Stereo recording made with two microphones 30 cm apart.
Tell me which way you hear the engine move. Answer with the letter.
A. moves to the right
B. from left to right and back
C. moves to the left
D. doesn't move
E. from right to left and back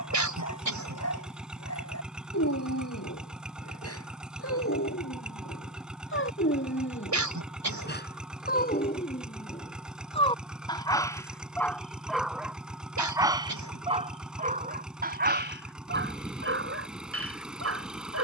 D.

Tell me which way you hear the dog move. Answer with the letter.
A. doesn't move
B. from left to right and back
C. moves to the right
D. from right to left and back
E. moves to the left
C.